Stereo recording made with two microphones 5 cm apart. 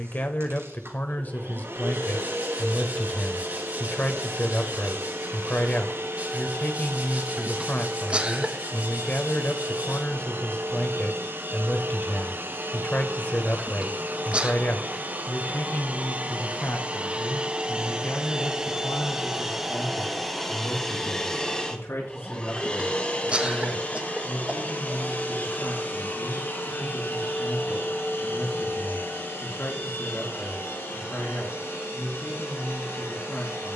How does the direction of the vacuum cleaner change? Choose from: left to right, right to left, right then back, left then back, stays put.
right to left.